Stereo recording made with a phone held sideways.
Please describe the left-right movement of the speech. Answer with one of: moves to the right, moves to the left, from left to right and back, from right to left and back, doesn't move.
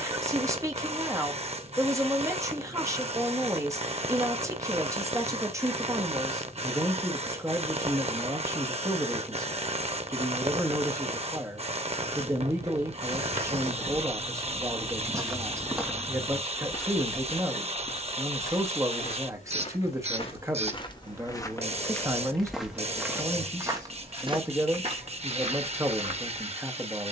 doesn't move.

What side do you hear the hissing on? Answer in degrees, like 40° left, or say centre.
40° right.